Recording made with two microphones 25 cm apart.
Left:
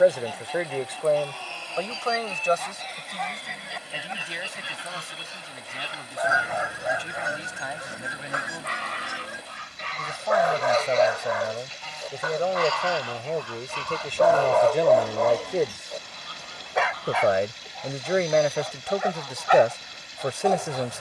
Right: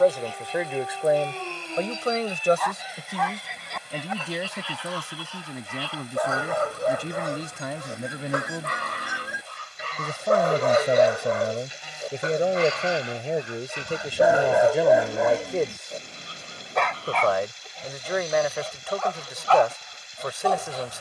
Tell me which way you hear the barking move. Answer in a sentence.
You can hear the barking go from the right side to the left.